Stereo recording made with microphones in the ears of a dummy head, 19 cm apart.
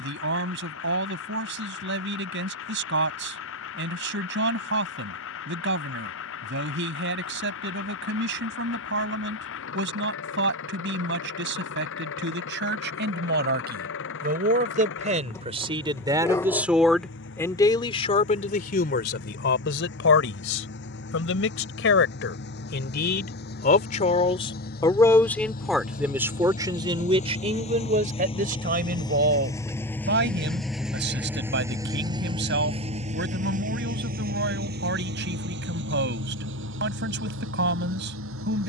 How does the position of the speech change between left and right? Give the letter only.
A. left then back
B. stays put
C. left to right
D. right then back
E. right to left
A.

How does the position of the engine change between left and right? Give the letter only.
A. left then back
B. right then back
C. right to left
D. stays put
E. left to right
E.